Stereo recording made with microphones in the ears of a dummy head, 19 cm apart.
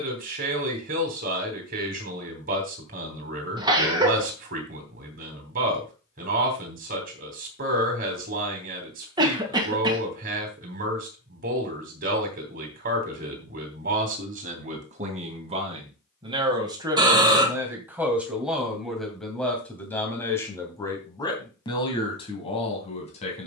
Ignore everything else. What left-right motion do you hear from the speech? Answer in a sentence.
You can hear the speech travel towards the left.